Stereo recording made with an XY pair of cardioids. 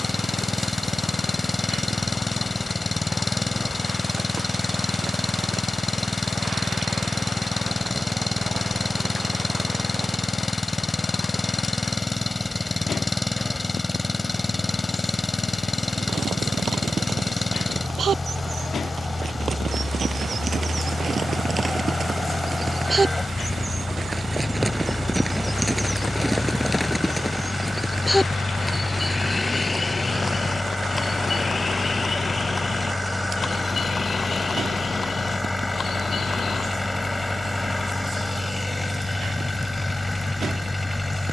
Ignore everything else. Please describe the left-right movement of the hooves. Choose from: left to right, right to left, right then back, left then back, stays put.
right to left.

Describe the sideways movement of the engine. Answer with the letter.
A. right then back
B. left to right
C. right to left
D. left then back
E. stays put
E.